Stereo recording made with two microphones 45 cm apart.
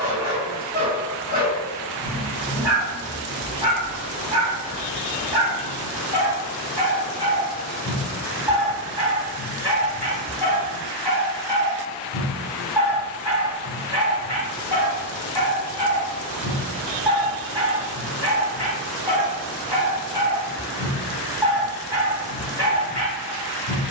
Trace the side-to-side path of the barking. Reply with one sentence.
In this clip you hear the barking stay put.